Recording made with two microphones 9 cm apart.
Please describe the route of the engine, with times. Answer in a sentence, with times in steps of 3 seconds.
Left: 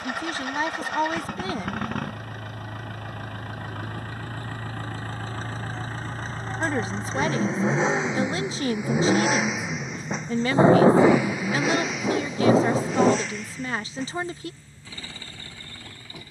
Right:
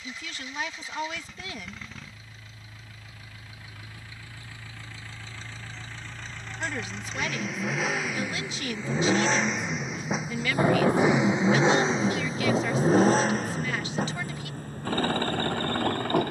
In this clip you hear the engine on the left from 0 s, in the centre from 9 s and on the right from 12 s.